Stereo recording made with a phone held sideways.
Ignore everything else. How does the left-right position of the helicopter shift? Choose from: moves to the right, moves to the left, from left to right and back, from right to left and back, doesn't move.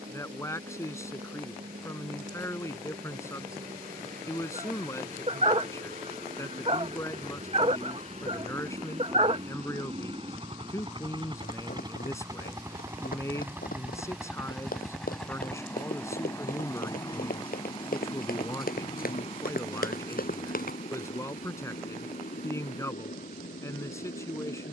moves to the left.